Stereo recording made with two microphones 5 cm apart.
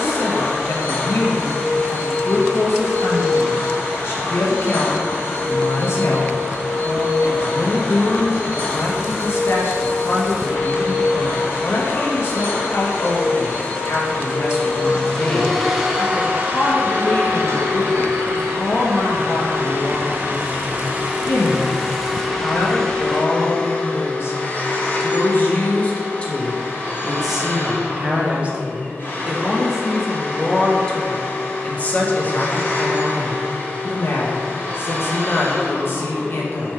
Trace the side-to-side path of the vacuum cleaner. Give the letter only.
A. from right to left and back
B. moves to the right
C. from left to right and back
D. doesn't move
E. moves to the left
C.